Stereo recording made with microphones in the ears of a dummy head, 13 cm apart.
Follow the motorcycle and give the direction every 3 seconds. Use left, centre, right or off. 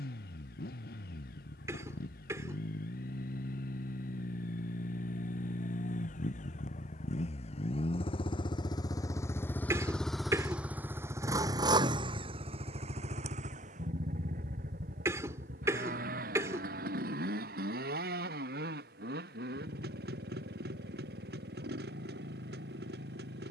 left, left, left, centre, right, right, right, right.